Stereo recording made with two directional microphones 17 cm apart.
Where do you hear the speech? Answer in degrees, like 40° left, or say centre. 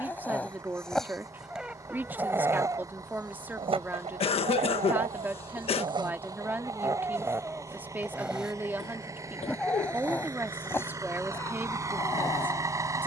10° right.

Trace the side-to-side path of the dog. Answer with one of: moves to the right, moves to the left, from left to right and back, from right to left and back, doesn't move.
from left to right and back.